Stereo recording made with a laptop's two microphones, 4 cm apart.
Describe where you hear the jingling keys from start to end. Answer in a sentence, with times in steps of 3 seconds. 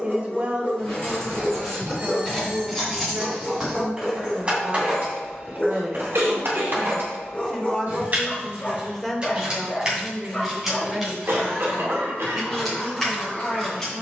In this clip you hear the jingling keys in the centre from 0 s, on the right from 3 s and in the centre from 9 s.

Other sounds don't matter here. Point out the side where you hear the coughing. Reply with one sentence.
In this clip you hear the coughing on the right.